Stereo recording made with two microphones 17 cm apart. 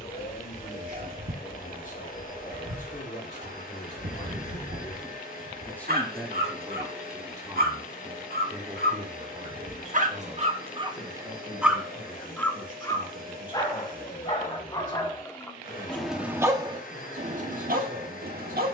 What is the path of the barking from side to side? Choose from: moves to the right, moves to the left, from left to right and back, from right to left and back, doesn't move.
from right to left and back.